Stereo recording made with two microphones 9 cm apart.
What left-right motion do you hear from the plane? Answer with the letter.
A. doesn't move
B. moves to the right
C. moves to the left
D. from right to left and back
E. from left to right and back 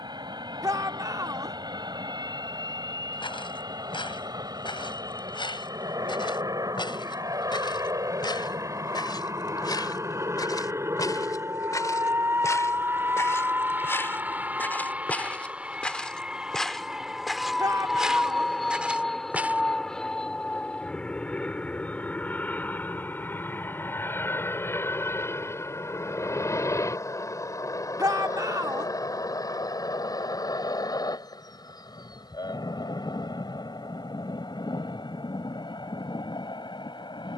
C.